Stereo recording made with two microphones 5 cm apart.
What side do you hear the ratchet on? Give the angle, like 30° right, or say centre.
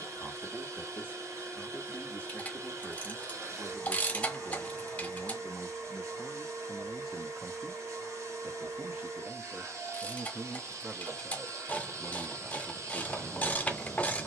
20° left.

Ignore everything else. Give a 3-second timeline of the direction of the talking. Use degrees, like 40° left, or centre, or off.
30° left, 30° left, 10° right, 20° right, 20° left.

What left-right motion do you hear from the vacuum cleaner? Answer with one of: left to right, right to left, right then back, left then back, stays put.
stays put.